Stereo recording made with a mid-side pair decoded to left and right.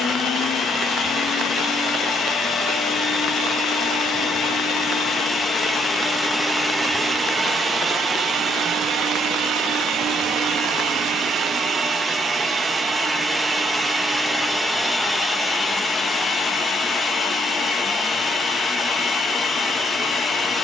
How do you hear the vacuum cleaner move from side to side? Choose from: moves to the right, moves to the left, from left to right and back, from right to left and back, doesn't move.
from left to right and back.